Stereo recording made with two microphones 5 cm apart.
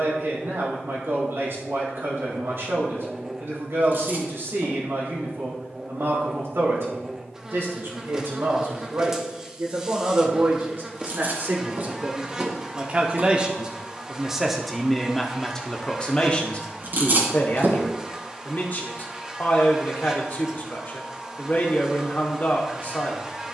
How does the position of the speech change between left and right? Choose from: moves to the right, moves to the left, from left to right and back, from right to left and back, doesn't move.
moves to the left.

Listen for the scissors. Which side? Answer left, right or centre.
right.